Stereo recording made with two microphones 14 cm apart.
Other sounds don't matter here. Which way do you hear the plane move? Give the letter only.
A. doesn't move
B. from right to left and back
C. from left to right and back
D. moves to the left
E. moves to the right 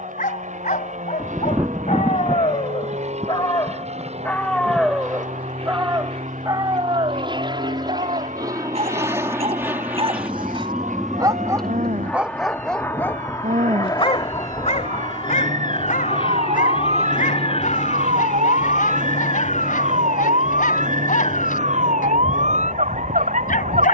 D.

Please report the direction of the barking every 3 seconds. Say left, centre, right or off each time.
left, centre, right, right, left, left, left, left.